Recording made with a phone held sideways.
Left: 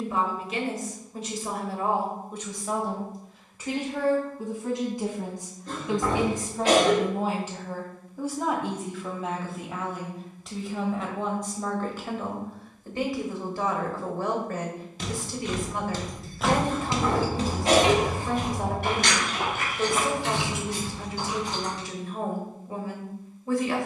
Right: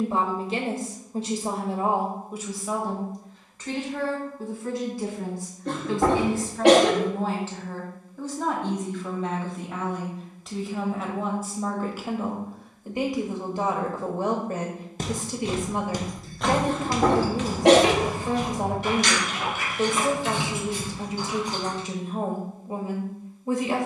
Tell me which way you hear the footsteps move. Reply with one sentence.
In this clip you hear the footsteps move to the left.